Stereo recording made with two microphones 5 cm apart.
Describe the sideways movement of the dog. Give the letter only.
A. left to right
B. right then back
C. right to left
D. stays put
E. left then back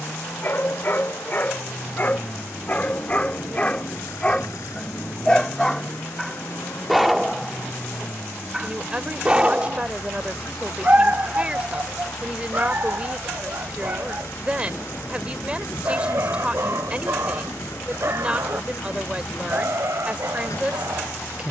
A.